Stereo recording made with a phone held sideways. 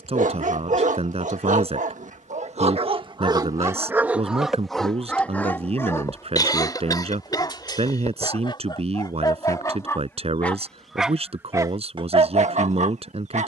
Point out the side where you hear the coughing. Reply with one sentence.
You can hear the coughing on the left.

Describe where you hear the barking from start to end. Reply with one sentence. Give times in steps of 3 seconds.
You can hear the barking on the right from 0 s, in the centre from 3 s, on the left from 6 s, in the centre from 9 s and on the right from 12 s.